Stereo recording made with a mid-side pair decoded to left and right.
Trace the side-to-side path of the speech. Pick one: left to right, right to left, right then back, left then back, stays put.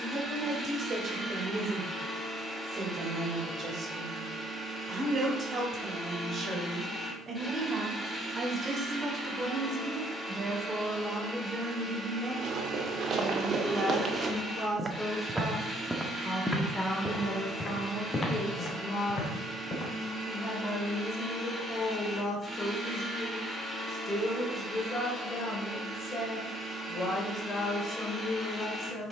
right to left.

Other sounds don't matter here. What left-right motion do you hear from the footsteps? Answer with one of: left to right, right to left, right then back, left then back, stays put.
right to left.